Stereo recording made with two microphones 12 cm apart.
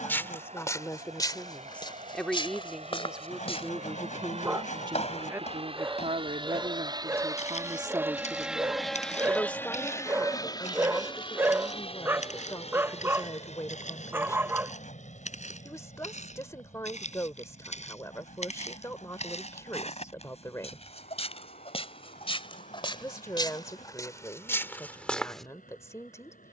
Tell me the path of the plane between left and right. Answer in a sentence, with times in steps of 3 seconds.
In this clip you hear the plane on the right from 0 s and on the left from 9 s.